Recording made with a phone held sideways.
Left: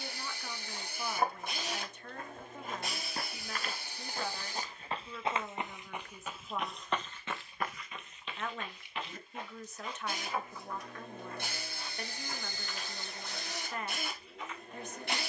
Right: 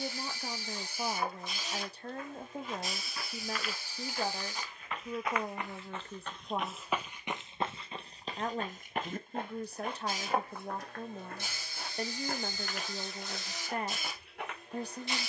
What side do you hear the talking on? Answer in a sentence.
You can hear the talking on the right.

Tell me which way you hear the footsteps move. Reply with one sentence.
In this clip you hear the footsteps go from the left side to the right.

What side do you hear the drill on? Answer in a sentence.
In this clip you hear the drill on the left.